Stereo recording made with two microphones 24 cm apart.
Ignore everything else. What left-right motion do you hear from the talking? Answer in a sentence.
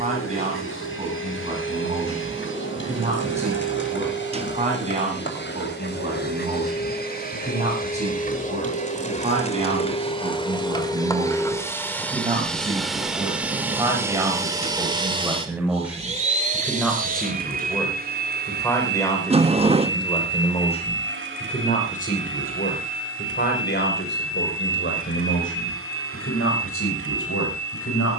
In this clip you hear the talking travel towards the left.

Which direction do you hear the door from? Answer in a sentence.
In this clip you hear the door on the right.